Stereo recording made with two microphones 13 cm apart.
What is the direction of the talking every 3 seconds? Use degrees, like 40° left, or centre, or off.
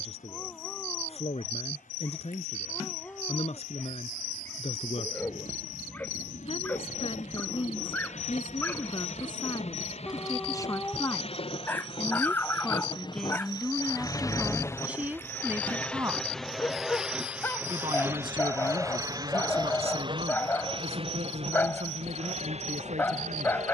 50° left, 50° left, 40° left, 30° left, centre, 20° right, 40° right, 50° right.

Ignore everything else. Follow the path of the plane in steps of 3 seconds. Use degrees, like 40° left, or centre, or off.
70° left, 70° left, 60° left, 50° left, 30° left, centre, 30° right, 50° right.